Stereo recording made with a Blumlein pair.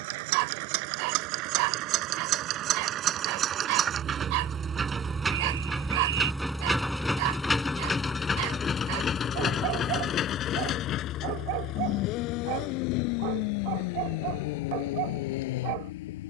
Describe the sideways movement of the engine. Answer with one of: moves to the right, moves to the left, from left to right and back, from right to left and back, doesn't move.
moves to the left.